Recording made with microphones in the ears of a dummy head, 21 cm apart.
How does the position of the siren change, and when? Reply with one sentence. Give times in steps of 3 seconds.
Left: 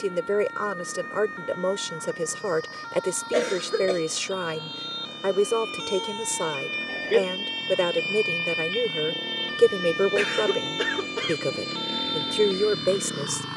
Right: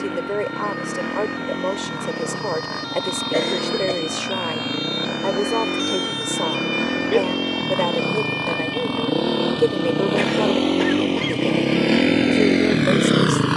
You can hear the siren on the right from 0 s, in the centre from 6 s and on the left from 9 s.